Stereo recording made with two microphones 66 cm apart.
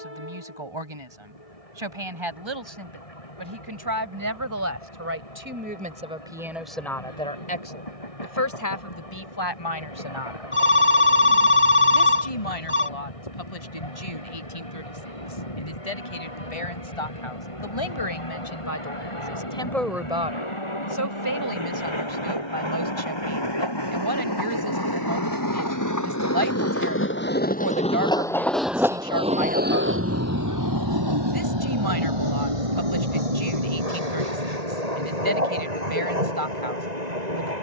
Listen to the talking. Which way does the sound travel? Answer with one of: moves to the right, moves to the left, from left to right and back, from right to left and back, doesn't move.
from right to left and back.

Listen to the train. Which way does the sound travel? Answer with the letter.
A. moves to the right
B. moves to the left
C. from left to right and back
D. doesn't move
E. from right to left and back
A.